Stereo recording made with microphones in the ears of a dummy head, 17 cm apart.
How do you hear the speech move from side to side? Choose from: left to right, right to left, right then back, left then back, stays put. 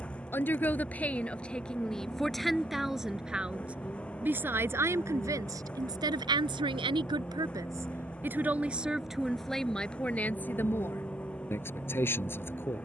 right then back.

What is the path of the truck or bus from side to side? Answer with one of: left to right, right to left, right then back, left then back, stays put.
stays put.